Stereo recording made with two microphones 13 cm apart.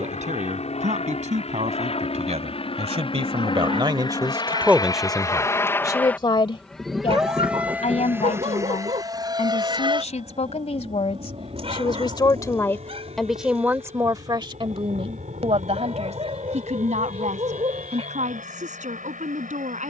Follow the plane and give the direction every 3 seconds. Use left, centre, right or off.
left, left, centre, right, right, right, right.